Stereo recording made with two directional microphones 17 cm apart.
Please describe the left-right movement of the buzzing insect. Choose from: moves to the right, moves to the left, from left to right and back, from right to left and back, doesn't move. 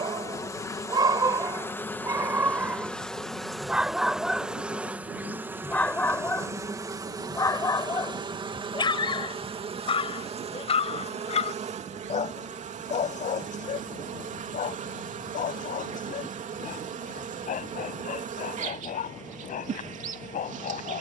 moves to the right.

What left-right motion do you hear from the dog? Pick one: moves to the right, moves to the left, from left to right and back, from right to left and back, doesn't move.
moves to the left.